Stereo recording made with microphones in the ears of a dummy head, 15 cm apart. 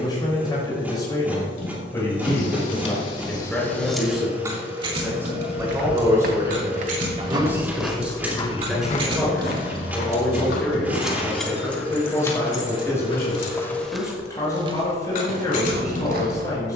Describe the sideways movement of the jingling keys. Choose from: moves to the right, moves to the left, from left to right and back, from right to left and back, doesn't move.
from left to right and back.